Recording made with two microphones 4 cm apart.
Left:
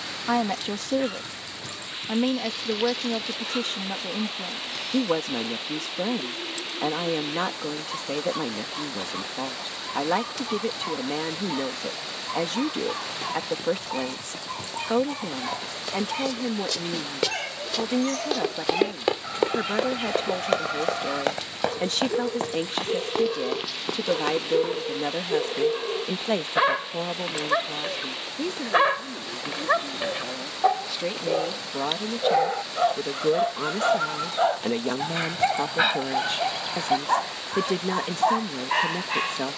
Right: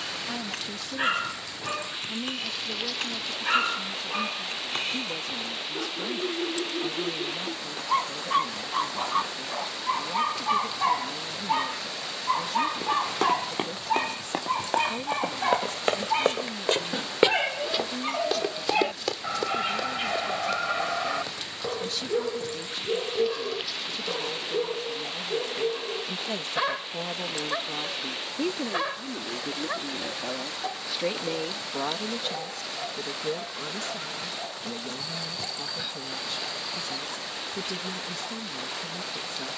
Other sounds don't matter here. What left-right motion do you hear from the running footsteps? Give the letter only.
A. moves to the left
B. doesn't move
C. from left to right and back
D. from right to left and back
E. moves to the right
A.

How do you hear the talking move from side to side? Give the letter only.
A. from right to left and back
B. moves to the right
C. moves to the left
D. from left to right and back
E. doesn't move
D.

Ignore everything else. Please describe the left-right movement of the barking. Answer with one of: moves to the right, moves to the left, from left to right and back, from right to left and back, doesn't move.
moves to the left.